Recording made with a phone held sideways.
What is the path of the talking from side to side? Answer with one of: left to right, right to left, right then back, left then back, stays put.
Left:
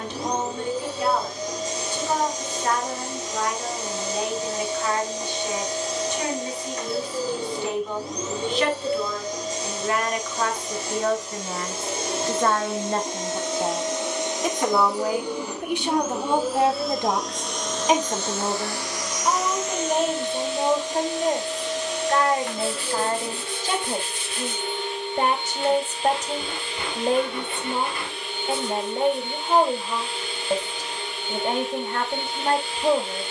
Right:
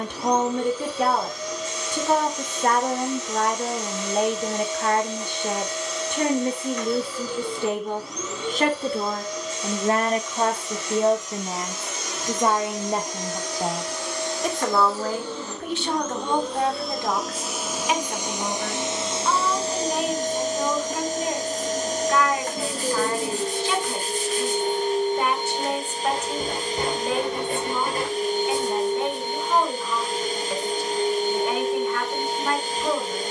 right to left.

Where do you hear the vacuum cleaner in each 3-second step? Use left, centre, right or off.
left, left, left, left, left, centre, right, right, right, right, right.